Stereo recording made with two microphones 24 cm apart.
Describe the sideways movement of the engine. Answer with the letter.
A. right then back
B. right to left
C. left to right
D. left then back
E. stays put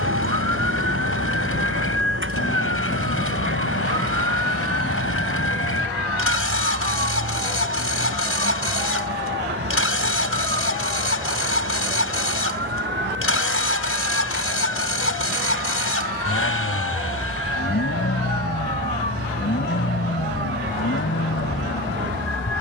E.